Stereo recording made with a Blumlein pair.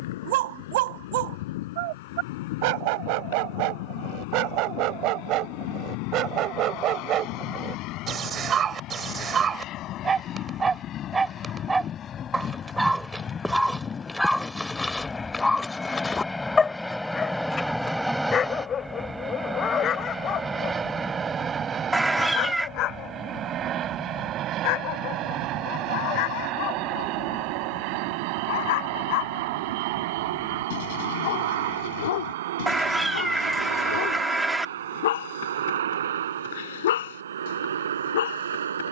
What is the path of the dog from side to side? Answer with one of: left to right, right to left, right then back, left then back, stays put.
right to left.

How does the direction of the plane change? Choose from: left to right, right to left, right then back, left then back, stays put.
left to right.